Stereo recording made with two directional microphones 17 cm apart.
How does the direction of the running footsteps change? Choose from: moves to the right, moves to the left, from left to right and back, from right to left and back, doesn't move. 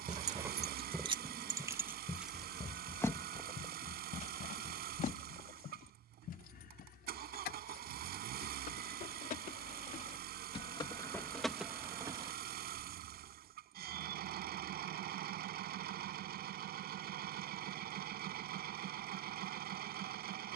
moves to the left.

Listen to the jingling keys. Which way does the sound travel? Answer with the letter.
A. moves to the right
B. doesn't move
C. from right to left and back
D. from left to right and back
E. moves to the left
C.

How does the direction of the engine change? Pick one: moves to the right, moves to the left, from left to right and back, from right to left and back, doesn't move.
doesn't move.